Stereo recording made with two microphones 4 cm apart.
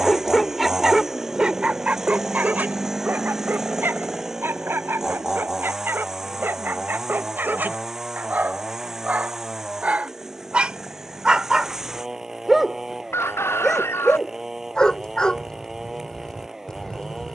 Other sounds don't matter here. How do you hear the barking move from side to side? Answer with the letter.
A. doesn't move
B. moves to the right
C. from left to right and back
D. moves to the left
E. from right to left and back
C.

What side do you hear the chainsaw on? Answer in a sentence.
In this clip you hear the chainsaw in the centre.